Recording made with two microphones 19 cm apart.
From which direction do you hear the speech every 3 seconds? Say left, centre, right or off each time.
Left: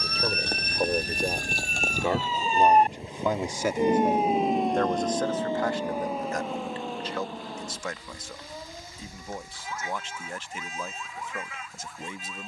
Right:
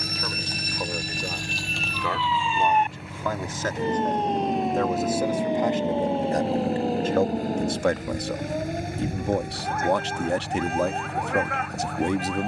left, centre, right, right.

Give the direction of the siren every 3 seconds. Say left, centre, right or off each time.
left, centre, right, right.